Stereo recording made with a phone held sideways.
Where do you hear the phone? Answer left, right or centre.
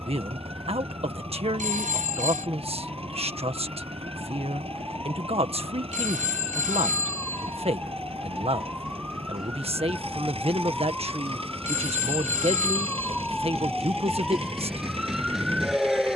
right.